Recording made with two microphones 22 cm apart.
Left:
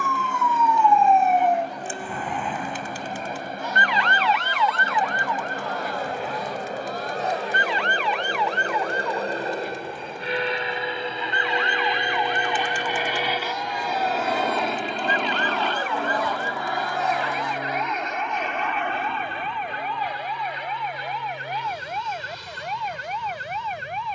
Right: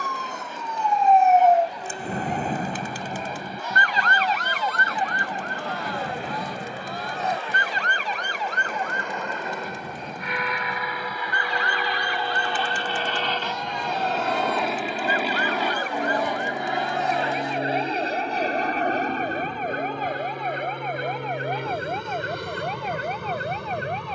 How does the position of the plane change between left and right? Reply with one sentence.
You can hear the plane move from left to right.